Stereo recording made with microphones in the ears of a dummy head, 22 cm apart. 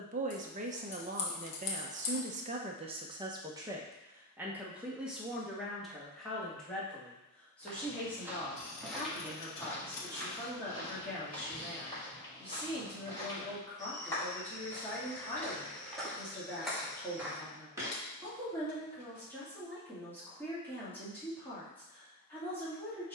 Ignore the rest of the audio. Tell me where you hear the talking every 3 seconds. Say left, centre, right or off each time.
right, centre, centre, centre, centre, centre, centre, centre.